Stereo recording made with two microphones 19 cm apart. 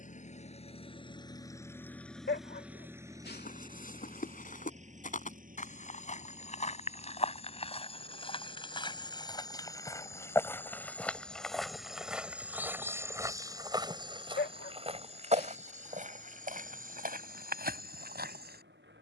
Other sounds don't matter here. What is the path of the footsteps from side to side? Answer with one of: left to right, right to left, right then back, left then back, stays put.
left to right.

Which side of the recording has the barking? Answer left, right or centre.
left.